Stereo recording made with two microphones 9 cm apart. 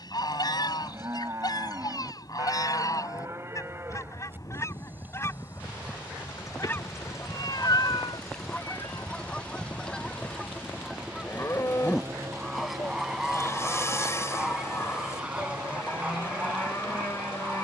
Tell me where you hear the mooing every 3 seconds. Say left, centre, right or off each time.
right, right, centre, left, left, left.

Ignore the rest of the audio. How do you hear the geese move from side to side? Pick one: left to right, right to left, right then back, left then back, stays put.
left to right.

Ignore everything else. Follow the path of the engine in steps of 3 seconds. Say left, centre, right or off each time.
left, left, left, centre, right, right.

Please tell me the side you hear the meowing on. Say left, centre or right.
left.